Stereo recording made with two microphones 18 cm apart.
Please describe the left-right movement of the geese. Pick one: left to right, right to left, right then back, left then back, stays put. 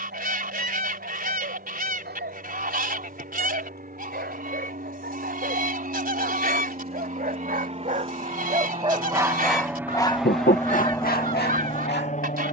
stays put.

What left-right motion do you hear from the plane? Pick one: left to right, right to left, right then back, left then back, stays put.
right to left.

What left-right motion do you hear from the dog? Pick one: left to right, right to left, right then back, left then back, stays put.
right to left.